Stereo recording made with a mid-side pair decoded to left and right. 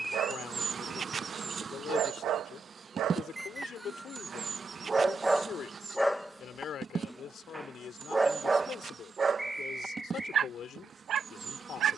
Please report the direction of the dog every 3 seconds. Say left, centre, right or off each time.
right, right, centre, right.